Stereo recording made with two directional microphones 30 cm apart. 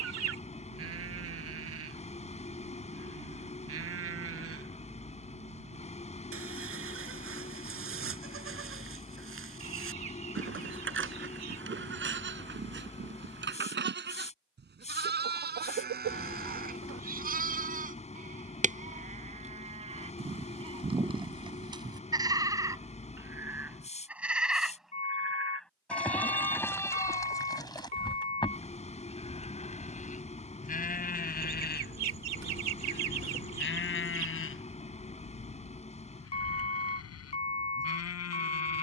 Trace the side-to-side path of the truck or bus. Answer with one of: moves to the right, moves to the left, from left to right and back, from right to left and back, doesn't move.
doesn't move.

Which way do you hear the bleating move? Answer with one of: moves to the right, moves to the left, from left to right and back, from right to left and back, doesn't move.
moves to the left.